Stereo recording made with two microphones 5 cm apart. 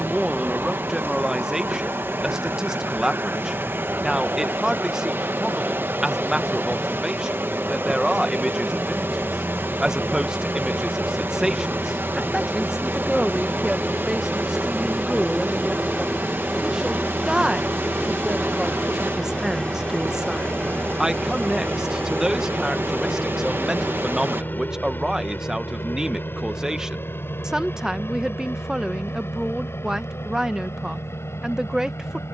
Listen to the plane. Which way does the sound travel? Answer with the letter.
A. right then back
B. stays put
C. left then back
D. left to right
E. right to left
E.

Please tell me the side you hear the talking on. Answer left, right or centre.
centre.